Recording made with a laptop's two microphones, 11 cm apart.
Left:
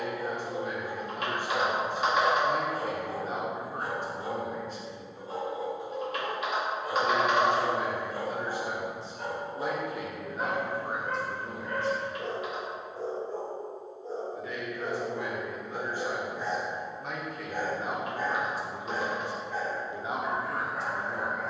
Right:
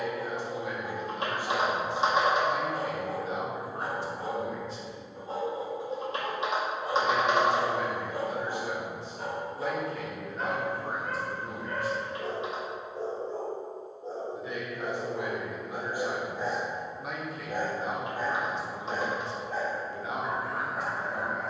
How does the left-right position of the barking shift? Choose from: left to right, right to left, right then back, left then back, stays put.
left then back.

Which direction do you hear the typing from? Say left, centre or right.
right.